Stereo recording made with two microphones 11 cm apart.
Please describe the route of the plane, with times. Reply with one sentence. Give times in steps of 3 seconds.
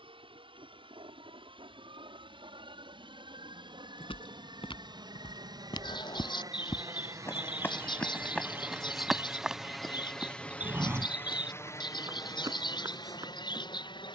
In this clip you hear the plane on the right from 0 s, in the centre from 9 s and on the left from 12 s.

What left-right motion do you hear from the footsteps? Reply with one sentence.
In this clip you hear the footsteps move to the right.